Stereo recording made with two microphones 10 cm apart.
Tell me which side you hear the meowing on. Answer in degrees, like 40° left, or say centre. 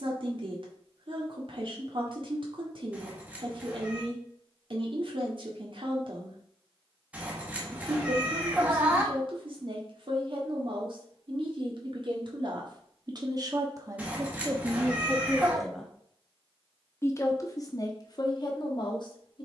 10° right.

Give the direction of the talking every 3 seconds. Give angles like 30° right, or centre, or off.
60° right, 60° right, 60° right, 60° right, 40° right, 20° left, 50° left.